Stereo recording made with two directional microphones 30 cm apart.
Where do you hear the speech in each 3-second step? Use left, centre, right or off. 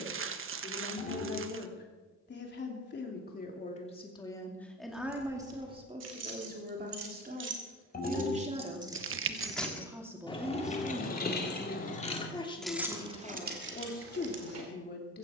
left, centre, right, centre, left.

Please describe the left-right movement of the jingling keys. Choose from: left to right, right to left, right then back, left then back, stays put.
left then back.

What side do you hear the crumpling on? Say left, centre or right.
right.